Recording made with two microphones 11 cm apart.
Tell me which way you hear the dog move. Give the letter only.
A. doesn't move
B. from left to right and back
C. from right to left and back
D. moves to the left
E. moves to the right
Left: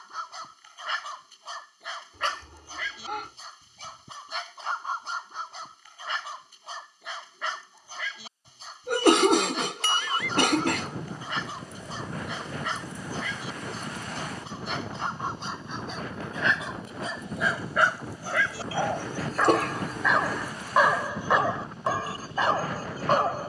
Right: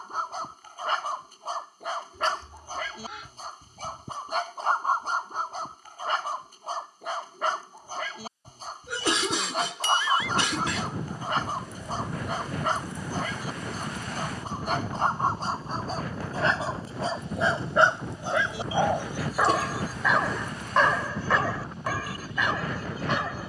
D.